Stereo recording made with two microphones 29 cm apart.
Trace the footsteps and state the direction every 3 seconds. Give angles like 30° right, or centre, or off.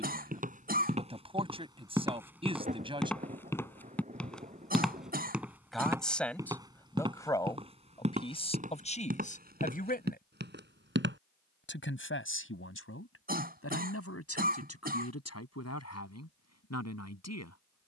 10° right, centre, 20° right, 30° right, off, off.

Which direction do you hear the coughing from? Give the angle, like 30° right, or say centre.
30° right.